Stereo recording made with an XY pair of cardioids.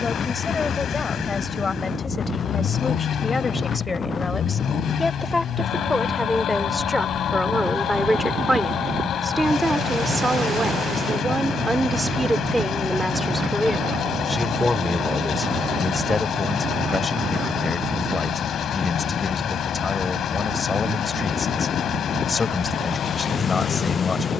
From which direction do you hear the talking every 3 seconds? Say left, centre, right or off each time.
left, left, centre, right, centre, left, left, left.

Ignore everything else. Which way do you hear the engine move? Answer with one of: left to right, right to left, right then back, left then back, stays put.
stays put.